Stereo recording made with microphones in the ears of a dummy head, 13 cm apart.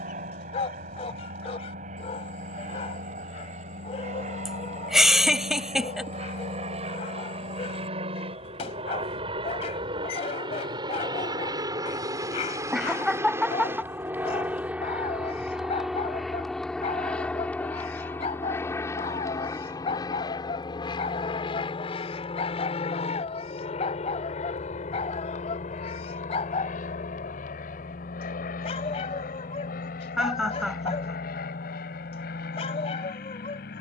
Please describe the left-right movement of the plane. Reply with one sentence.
In this clip you hear the plane move from right to left.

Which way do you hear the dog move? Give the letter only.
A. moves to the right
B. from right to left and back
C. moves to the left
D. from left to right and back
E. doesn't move
E.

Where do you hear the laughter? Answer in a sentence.
In this clip you hear the laughter in the centre.